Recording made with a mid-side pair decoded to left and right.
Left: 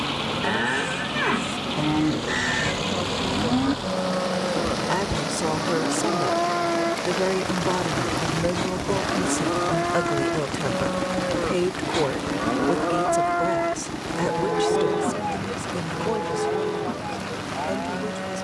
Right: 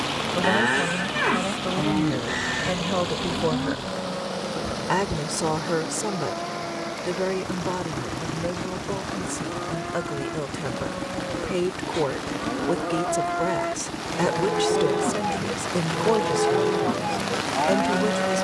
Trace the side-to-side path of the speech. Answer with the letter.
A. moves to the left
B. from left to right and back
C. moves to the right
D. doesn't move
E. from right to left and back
E.